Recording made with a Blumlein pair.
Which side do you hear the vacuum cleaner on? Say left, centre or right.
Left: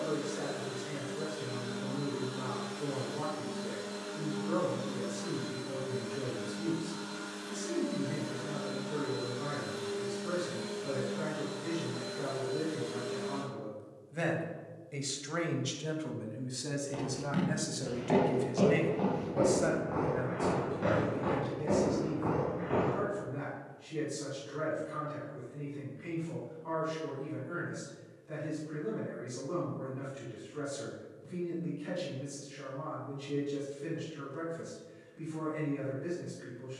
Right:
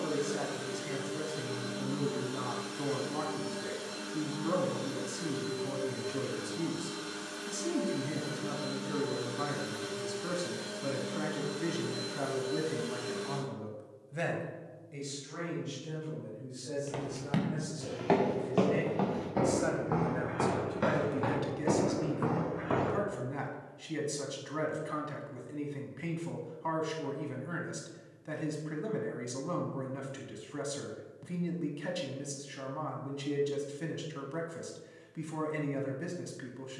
right.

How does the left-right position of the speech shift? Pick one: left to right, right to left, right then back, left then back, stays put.
left then back.